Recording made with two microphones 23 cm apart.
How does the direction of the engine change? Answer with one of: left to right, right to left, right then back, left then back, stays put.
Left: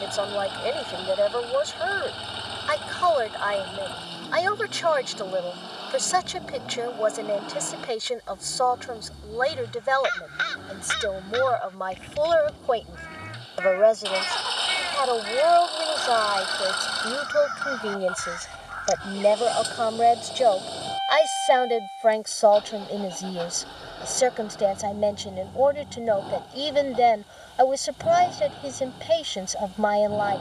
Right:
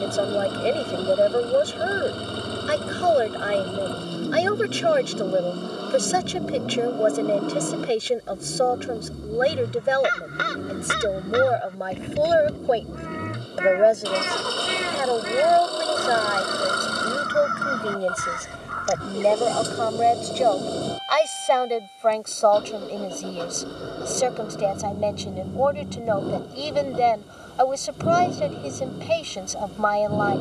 stays put.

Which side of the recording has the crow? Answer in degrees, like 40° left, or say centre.
60° right.